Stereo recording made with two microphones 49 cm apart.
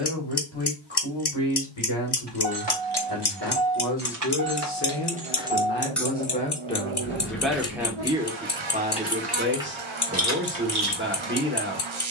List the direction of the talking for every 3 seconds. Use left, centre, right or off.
left, left, centre, right.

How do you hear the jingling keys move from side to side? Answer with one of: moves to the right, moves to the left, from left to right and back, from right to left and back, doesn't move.
from right to left and back.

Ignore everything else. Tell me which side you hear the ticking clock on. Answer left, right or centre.
left.